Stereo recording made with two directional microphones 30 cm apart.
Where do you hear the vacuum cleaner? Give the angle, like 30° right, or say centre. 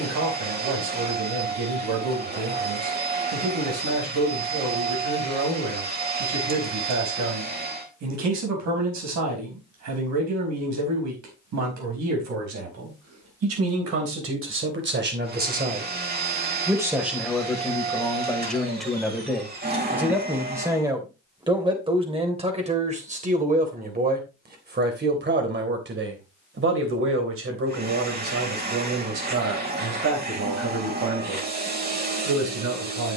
30° right.